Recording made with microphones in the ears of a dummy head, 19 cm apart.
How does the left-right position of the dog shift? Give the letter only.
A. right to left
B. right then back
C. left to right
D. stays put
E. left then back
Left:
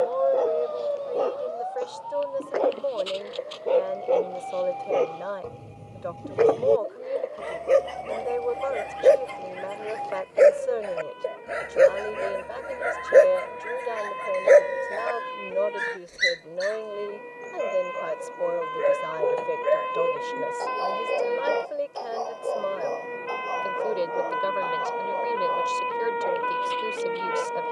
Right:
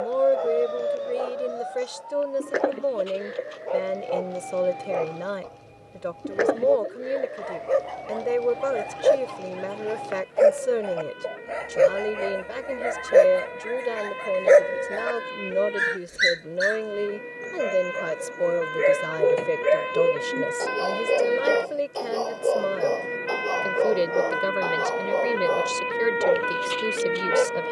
C.